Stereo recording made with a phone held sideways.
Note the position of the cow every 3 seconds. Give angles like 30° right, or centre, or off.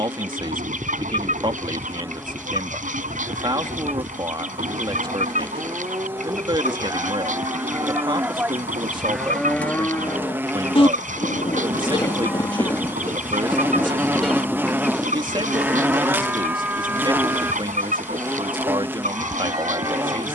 30° right, 30° right, 20° right, 20° left, 10° left, 10° right, 30° right.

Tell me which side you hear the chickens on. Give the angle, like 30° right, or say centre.
70° right.